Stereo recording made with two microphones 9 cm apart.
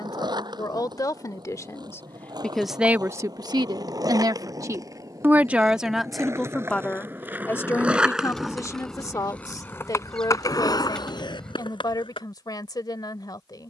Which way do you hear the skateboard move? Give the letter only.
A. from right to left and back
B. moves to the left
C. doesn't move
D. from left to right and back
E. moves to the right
B.